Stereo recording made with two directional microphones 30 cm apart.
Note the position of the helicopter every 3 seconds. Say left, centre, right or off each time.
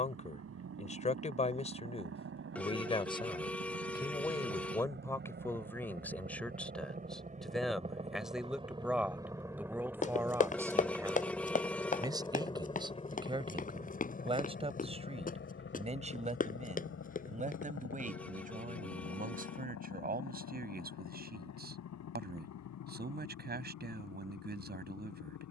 right, right, right, centre, left, left, left, left, left.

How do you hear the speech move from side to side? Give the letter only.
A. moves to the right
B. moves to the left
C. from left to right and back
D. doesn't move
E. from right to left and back
A.